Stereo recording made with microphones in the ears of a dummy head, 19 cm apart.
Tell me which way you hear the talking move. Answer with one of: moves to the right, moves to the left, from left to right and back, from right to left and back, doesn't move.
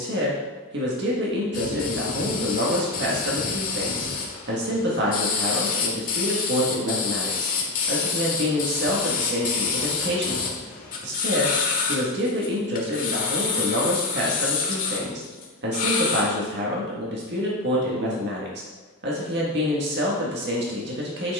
doesn't move.